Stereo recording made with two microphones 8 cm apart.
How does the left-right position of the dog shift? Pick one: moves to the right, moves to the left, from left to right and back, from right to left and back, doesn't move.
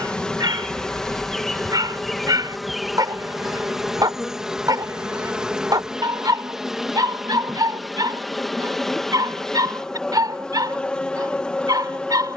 doesn't move.